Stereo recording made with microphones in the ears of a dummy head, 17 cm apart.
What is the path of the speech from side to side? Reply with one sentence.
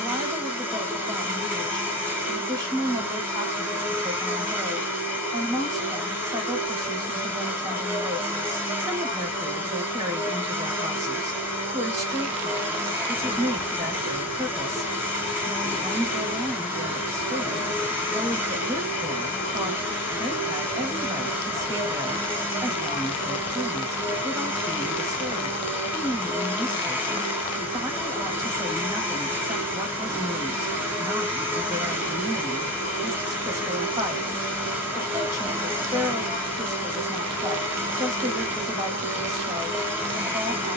You can hear the speech stay in one place.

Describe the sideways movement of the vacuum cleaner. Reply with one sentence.
You can hear the vacuum cleaner stay put.